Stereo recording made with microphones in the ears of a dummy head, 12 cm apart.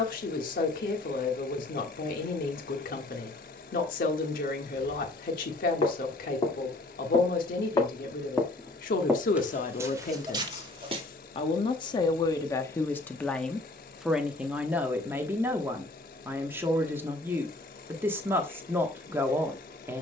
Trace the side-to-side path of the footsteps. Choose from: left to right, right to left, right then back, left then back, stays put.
left to right.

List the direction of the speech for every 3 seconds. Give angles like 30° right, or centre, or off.
80° left, 80° left, 80° left, 60° left, 10° left, 20° right, 20° right.